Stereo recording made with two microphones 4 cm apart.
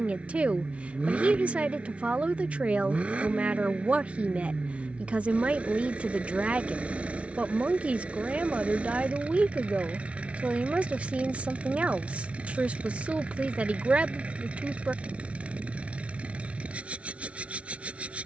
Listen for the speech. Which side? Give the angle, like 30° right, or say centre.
30° right.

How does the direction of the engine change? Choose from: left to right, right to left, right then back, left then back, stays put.
stays put.